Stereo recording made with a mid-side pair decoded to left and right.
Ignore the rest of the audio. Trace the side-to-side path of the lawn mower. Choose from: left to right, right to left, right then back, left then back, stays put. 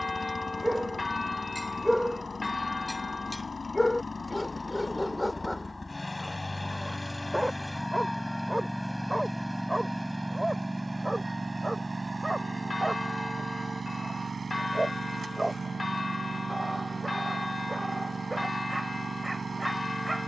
left to right.